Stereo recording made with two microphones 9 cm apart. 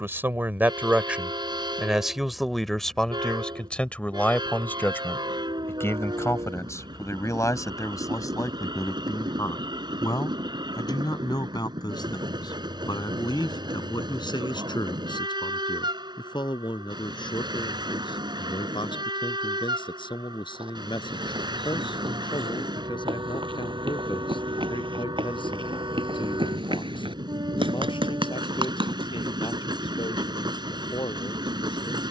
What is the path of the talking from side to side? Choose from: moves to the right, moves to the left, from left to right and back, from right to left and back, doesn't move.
moves to the left.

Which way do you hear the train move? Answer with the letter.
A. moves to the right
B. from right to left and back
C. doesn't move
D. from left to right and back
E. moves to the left
C.